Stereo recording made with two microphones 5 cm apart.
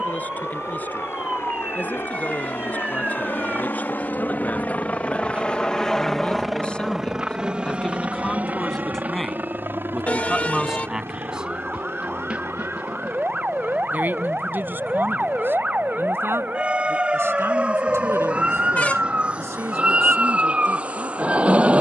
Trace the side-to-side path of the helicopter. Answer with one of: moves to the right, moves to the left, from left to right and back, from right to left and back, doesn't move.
moves to the right.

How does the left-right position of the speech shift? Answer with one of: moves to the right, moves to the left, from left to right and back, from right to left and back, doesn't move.
moves to the right.